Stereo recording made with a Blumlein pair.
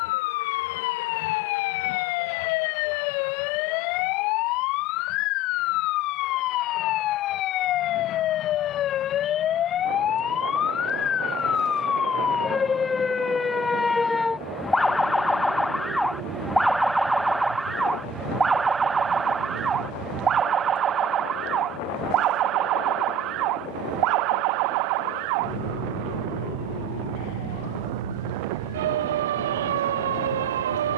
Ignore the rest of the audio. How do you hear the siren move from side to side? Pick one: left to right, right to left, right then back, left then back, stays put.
left to right.